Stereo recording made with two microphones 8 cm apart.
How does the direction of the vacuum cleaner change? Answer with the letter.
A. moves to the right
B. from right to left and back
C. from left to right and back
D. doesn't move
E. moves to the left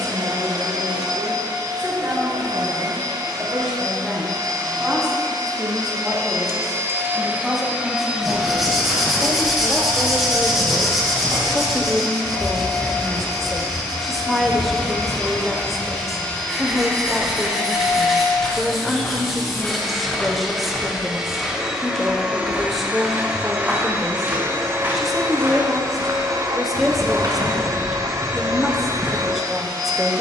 B.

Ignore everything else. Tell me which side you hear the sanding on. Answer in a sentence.
In this clip you hear the sanding in the centre.